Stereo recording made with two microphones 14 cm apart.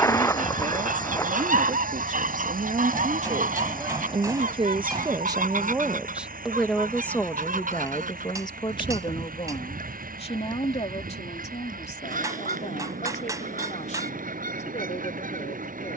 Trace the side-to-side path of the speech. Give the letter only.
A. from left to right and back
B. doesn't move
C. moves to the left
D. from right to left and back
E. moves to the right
C.